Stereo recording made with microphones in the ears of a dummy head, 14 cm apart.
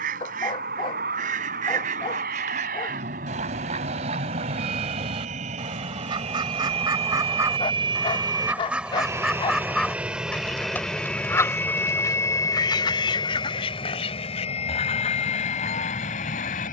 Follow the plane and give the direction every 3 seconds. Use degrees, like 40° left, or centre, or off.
60° right, 50° right, 30° right, centre, 30° left, 40° left.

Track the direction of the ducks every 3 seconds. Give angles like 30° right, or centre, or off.
60° right, 40° right, 20° right, 10° left, 40° left, 50° left.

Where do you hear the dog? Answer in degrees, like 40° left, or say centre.
30° left.